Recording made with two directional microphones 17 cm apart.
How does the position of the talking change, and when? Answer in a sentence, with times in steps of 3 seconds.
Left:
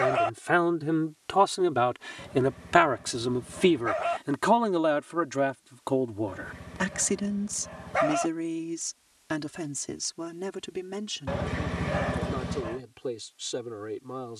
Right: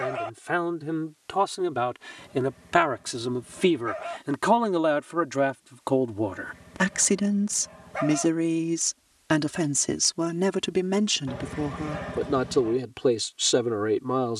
In this clip you hear the talking in the centre from 0 s and on the right from 6 s.